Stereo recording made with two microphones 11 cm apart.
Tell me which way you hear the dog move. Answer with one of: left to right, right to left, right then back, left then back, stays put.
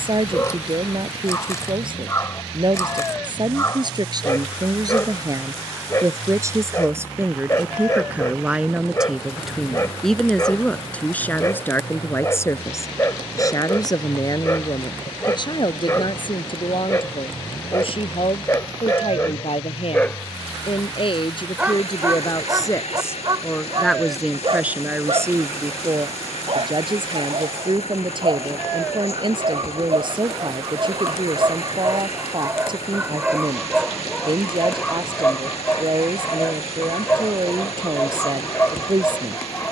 right then back.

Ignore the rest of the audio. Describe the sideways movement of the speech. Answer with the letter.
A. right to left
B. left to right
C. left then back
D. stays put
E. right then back
C.